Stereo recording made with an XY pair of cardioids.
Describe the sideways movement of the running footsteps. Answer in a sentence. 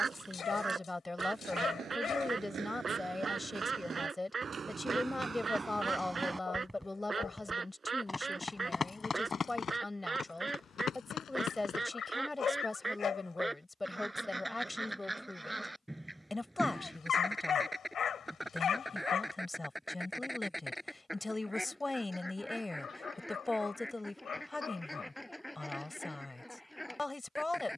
You can hear the running footsteps go from the right side to the left.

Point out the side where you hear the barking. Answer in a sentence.
You can hear the barking on the left.